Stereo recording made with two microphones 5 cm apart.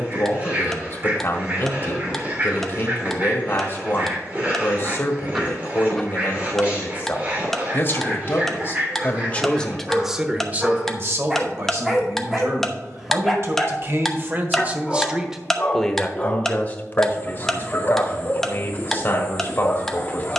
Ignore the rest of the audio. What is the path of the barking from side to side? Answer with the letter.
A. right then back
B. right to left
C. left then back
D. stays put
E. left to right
B.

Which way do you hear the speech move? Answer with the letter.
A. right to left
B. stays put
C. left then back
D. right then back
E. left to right
D.